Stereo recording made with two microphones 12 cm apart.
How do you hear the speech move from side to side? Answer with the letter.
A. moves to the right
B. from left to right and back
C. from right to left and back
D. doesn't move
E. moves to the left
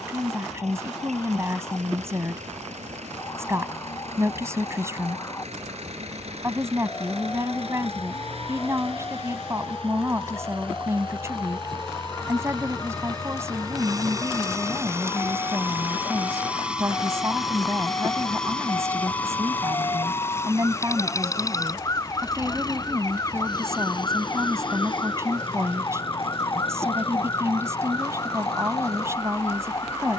D.